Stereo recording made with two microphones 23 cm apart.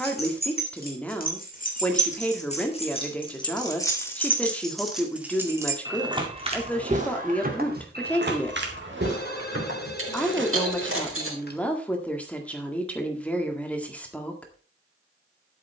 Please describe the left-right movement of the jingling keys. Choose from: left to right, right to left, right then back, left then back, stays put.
left to right.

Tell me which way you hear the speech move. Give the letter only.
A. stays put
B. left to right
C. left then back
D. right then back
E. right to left
A.